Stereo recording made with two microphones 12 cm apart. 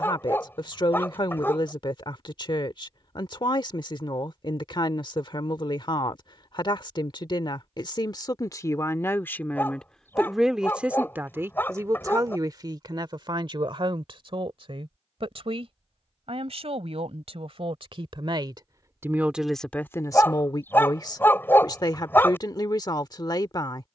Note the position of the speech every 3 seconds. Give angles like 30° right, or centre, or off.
40° left, 40° left, 40° left, centre, 40° right, 60° right, centre, 40° left.